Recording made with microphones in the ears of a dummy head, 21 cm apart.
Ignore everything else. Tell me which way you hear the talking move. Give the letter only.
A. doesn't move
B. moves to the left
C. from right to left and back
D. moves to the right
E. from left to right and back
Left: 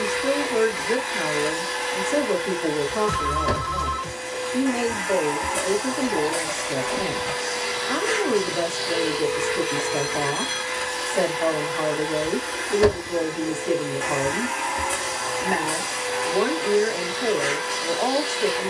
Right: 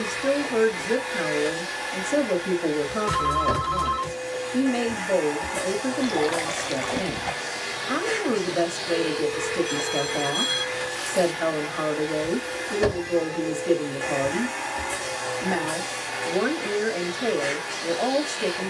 A.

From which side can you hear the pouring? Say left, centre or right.
right.